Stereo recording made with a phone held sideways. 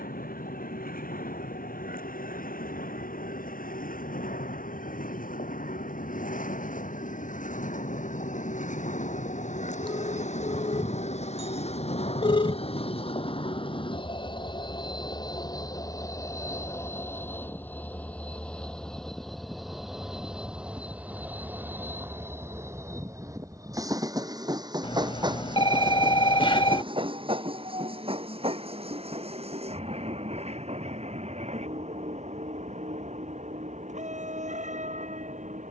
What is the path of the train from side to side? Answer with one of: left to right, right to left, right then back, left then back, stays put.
left to right.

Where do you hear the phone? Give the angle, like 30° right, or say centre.
40° left.